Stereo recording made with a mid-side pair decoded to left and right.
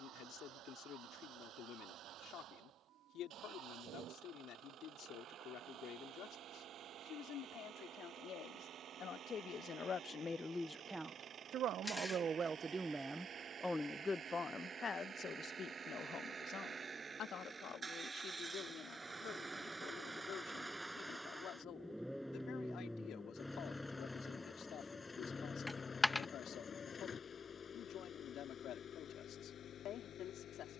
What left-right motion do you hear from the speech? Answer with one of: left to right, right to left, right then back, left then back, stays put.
right then back.